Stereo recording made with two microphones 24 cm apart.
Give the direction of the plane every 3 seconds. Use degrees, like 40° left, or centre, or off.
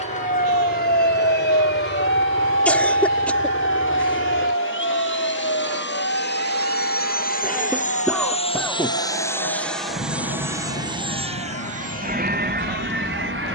70° left, 60° left, 40° left, 10° right, 40° right.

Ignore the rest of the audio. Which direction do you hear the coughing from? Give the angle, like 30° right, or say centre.
10° left.